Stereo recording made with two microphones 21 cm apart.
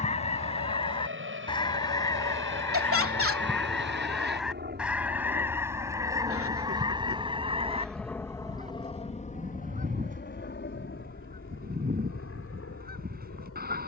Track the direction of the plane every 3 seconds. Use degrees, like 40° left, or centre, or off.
70° right, 50° right, 10° right, 40° left, 60° left.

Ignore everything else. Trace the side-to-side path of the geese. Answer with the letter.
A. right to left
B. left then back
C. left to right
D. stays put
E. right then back
C.